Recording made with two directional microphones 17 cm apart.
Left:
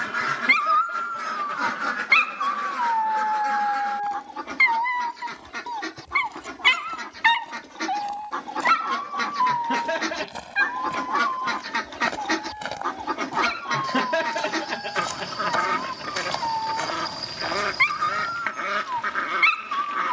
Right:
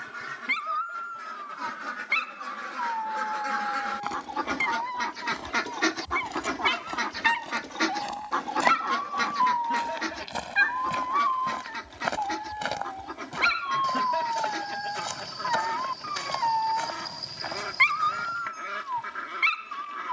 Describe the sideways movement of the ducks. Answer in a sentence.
In this clip you hear the ducks move from left to right and back again.